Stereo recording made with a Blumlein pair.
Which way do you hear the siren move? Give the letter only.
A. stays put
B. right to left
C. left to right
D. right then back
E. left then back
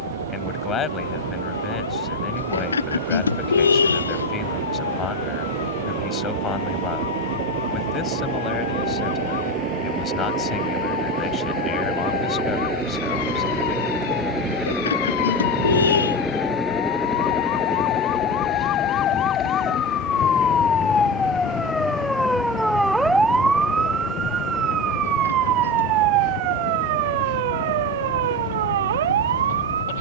C.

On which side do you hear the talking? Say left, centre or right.
left.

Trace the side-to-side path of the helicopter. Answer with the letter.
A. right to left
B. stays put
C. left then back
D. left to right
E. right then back
A.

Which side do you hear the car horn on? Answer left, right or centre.
left.